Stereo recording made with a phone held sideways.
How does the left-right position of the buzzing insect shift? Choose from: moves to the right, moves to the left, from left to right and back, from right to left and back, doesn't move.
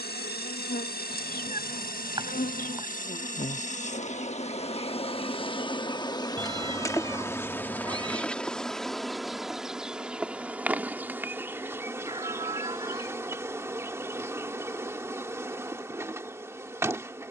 moves to the right.